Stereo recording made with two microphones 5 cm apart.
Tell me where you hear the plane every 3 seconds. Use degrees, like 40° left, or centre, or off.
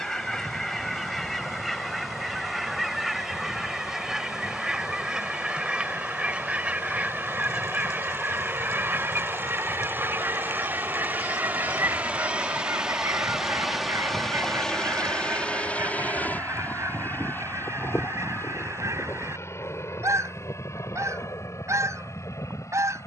70° right, 70° right, 60° right, 40° right, 10° right, 30° left, 50° left, 60° left.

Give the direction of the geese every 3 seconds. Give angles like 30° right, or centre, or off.
centre, 10° right, 30° right, 50° right, 60° right, 70° right, 80° right, 80° right.